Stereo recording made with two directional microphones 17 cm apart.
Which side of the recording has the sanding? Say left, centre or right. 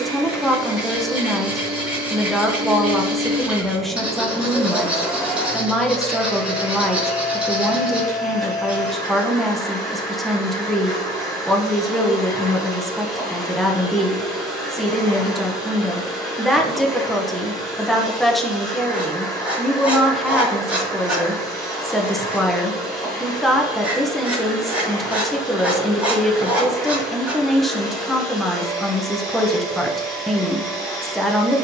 centre.